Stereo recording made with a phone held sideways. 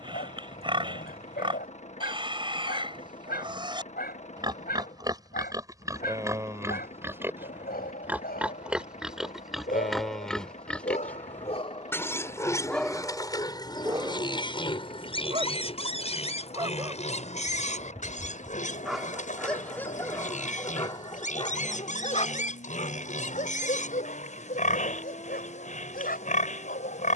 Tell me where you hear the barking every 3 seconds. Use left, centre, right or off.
left, left, left, left, centre, right, centre, left, left.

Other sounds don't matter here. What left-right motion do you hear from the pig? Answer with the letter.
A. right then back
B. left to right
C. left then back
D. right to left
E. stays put
D.